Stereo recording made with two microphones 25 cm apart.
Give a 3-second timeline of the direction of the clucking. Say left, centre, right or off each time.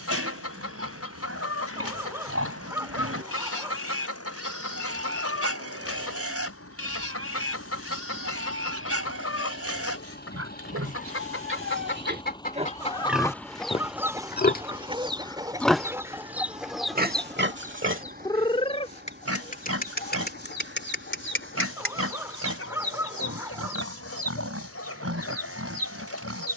left, left, left, left, centre, centre, left, left, left.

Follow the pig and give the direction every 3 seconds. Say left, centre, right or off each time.
right, right, right, right, centre, right, right, right, right.